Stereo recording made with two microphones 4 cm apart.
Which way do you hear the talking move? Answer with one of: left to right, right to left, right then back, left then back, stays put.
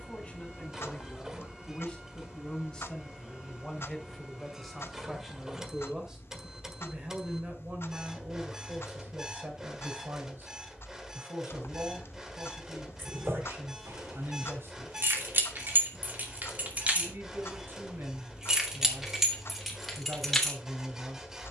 left to right.